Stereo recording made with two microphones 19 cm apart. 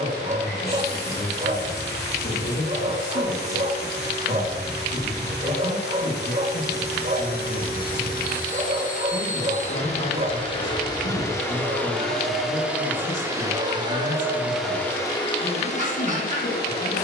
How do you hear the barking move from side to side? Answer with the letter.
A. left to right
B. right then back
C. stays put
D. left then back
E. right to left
C.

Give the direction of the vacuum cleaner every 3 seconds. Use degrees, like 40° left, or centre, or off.
60° left, 60° left, 50° left, 30° left, 10° right, 40° left.